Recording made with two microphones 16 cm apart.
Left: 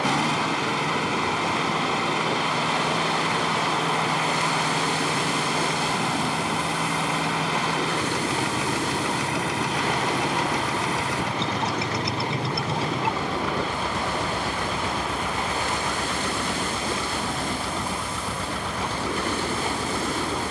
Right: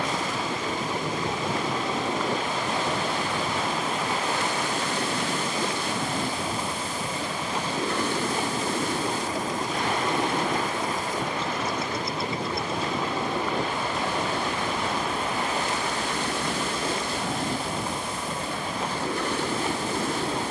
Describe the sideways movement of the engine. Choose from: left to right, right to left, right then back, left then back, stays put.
stays put.